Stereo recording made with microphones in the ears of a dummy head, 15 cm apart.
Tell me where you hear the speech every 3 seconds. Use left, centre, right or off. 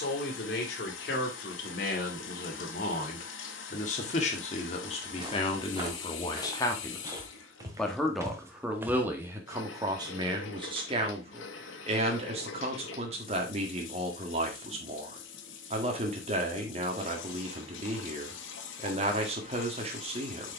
left, left, centre, right, right, right, right.